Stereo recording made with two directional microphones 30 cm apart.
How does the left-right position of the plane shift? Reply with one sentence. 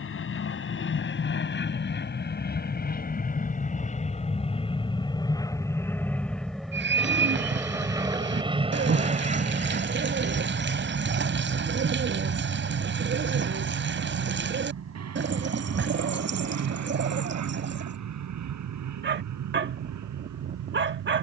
You can hear the plane travel towards the right.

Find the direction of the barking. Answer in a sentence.
You can hear the barking on the right.